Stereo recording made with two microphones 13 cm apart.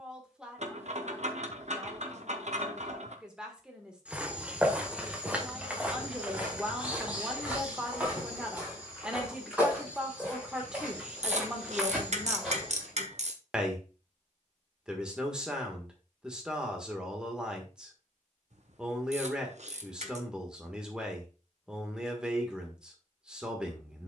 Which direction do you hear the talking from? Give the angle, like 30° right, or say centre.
10° right.